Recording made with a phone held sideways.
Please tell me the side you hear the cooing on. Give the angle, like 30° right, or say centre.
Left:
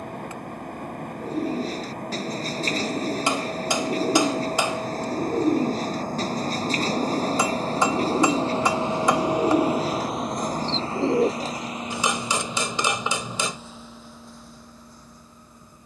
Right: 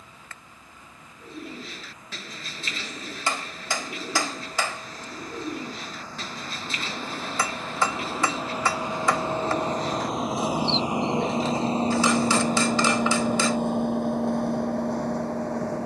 40° left.